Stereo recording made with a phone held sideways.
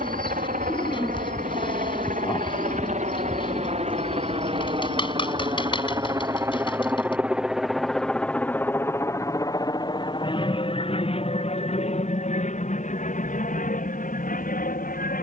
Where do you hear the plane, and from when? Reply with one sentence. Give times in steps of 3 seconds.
You can hear the plane on the right from 0 s, in the centre from 6 s and on the left from 9 s.